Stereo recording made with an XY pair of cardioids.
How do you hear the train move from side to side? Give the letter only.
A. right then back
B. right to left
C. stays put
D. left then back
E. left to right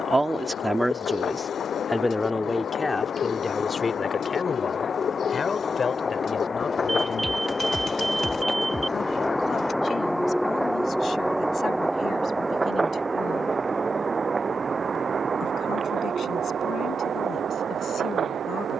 E.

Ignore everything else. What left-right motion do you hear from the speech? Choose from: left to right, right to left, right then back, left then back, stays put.
right to left.